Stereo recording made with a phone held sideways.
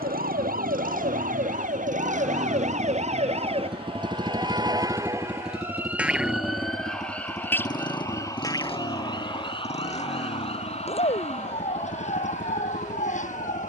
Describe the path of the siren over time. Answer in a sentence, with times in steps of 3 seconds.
In this clip you hear the siren on the right from 0 s, in the centre from 6 s and on the left from 9 s.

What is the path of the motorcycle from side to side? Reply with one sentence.
You can hear the motorcycle move from right to left.